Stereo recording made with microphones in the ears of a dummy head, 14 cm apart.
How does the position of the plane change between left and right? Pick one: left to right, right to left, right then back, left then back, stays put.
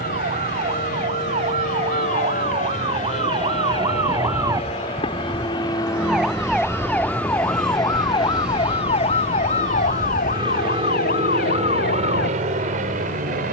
left to right.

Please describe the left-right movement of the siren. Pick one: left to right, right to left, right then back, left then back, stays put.
right to left.